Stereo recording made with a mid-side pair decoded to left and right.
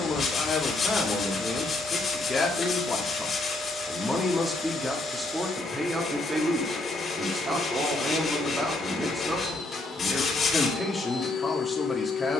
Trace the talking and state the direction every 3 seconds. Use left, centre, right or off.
left, centre, right, centre.